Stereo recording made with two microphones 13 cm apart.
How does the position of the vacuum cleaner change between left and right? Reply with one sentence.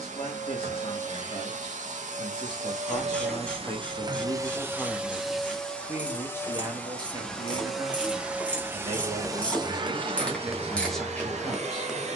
You can hear the vacuum cleaner move from right to left and back again.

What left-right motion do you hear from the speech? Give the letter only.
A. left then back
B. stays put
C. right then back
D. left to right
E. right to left
C.